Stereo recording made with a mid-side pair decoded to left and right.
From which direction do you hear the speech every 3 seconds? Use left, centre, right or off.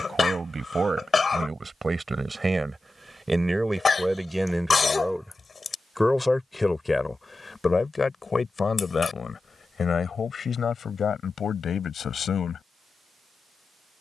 right, centre, left, left, left.